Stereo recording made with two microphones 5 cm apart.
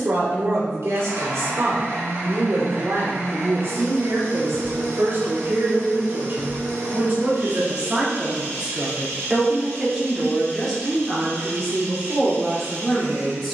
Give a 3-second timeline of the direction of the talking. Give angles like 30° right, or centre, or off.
70° right, 60° right, 30° right, centre, 10° left.